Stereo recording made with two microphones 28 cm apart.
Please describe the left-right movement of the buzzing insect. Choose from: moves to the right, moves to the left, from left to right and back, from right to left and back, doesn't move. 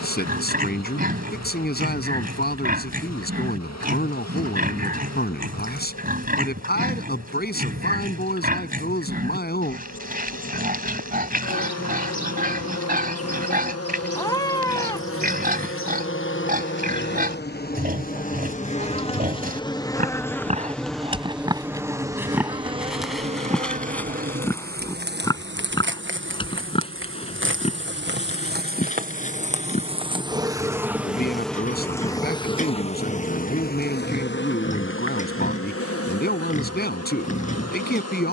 from left to right and back.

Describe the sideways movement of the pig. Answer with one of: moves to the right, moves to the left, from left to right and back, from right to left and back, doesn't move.
moves to the left.